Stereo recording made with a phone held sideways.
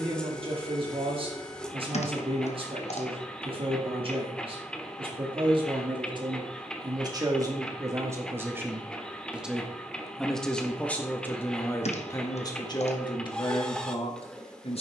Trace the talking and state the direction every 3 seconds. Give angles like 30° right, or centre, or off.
40° right, 40° right, 30° right, 10° left, 40° left.